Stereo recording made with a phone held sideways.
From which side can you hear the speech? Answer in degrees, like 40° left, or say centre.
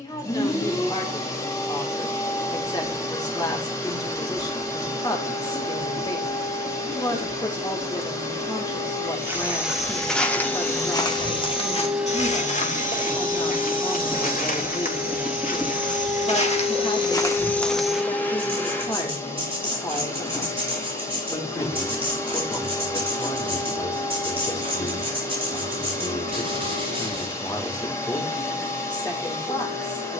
20° left.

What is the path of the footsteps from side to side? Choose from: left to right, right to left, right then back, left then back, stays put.
left then back.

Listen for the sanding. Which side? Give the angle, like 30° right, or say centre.
30° right.